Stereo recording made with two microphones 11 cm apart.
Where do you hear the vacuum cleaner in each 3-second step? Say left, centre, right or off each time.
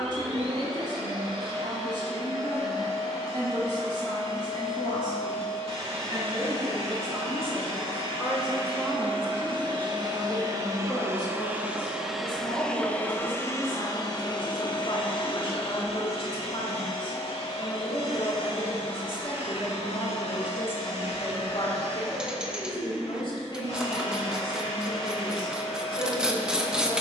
right, right, right, right, left, left, left, left, left.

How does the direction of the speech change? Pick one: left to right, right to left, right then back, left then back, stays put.
right to left.